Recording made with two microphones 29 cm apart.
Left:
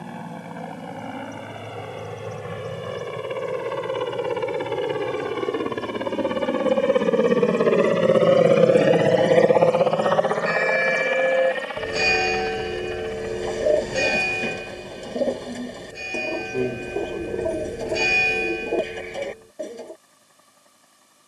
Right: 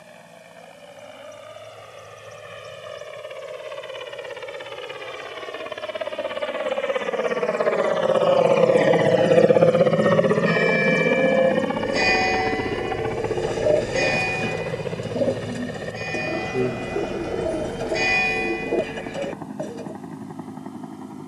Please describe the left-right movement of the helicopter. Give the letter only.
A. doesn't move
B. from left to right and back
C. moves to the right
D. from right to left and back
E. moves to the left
C.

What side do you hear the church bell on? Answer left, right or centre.
centre.